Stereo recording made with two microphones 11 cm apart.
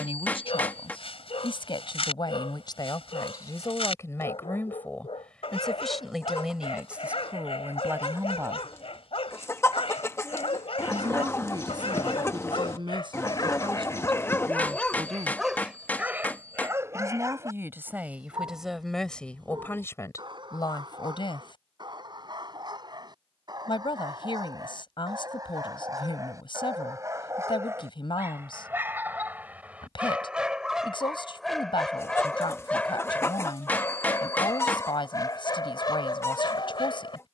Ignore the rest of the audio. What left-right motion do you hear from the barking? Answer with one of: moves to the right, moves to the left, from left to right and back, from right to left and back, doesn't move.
from left to right and back.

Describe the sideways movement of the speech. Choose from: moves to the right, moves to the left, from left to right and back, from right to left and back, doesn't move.
from left to right and back.